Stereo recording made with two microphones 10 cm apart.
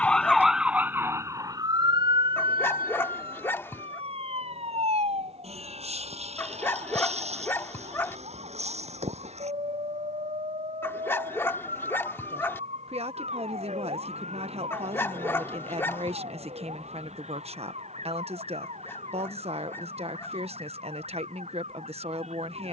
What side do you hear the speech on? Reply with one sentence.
In this clip you hear the speech on the right.